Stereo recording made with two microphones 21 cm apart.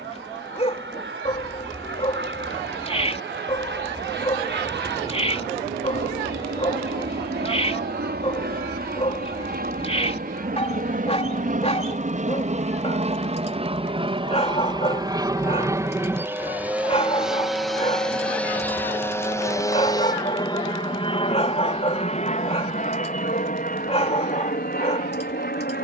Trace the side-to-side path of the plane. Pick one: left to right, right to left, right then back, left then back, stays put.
right to left.